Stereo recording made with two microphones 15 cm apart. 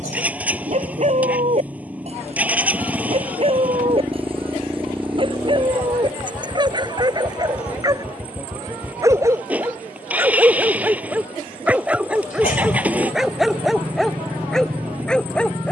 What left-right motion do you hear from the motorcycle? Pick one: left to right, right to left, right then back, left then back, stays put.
stays put.